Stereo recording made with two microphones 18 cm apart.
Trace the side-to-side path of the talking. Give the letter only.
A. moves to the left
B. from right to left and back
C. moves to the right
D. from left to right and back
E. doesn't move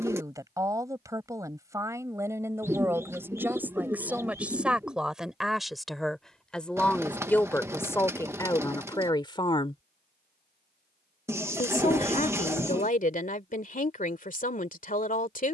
A.